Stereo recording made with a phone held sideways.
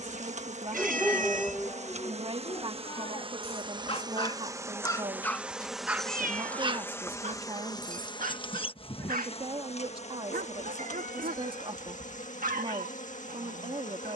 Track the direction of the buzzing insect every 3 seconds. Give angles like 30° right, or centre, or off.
50° right, 20° right, 20° left, 50° left, 60° left.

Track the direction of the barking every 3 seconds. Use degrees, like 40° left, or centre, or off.
10° left, 20° left, 50° right, 70° right, 70° right.